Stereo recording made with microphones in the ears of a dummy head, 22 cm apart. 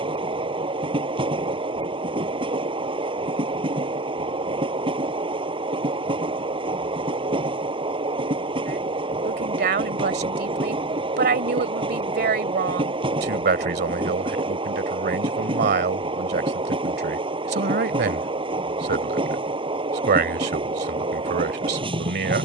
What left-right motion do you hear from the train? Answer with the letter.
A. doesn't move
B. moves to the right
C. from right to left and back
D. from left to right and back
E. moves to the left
A.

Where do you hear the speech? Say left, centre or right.
right.